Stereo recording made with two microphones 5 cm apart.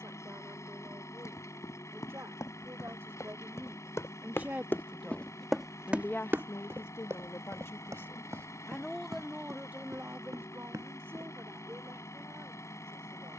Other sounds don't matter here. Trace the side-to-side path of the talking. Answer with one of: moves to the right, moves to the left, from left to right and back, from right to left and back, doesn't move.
from right to left and back.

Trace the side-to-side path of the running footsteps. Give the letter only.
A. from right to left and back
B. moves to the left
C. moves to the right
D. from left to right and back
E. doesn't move
C.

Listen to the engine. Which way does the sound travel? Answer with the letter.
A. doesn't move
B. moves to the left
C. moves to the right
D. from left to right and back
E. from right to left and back
A.